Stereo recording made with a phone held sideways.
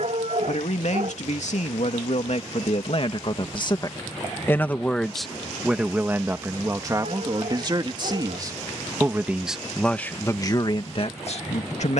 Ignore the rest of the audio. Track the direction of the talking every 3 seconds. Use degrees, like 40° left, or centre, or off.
60° left, 20° left, 30° right, 30° left.